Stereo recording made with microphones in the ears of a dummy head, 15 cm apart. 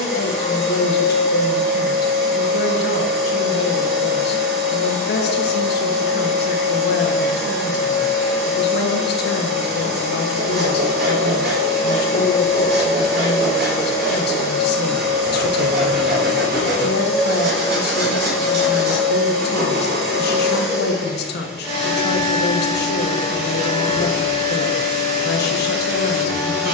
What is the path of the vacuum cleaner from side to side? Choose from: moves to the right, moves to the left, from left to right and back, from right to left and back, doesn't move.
doesn't move.